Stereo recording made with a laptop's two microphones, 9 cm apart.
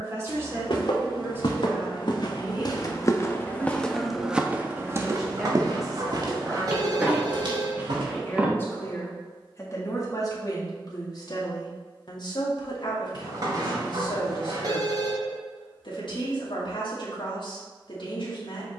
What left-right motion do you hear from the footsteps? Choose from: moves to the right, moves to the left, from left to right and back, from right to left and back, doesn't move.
moves to the right.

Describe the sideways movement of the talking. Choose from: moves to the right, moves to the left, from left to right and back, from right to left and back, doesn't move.
moves to the left.